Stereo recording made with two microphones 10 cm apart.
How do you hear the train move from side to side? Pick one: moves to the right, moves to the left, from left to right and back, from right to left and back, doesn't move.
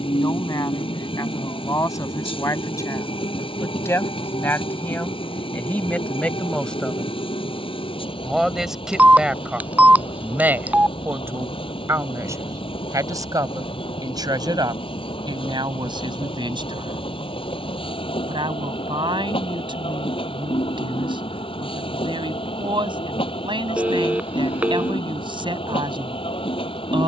doesn't move.